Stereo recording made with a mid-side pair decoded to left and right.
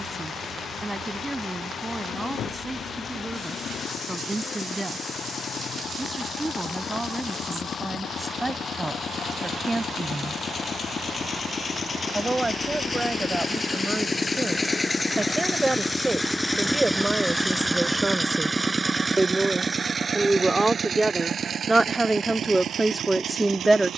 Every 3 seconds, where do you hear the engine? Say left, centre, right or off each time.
left, left, left, left, left, centre, right, right.